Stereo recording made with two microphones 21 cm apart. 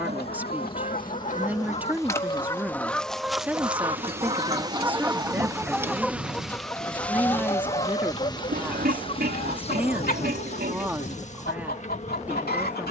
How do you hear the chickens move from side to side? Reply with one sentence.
You can hear the chickens go right and come back.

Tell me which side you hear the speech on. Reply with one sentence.
In this clip you hear the speech in the centre.